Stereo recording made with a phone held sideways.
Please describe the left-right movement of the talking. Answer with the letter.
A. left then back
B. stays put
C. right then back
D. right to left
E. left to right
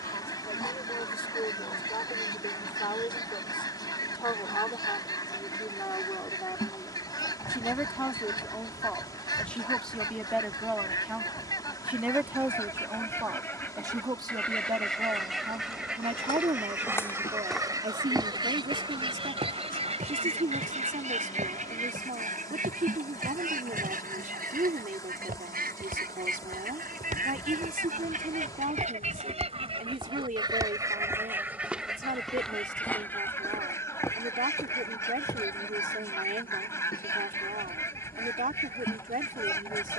E.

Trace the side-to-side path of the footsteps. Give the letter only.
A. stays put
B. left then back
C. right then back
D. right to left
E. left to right
C.